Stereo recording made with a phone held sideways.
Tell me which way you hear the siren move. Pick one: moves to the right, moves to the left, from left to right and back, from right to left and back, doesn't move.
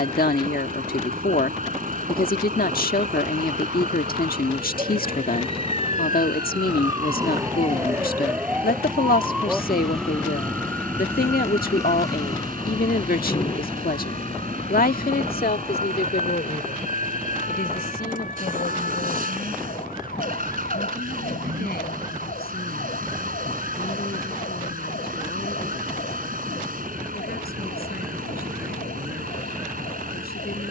moves to the left.